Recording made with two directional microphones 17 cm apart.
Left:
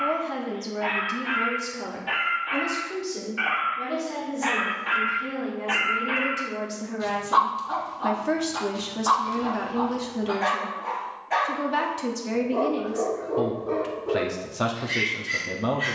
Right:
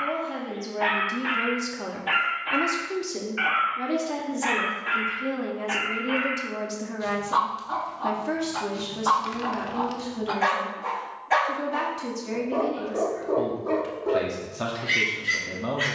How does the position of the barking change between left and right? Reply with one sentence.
In this clip you hear the barking go left and come back.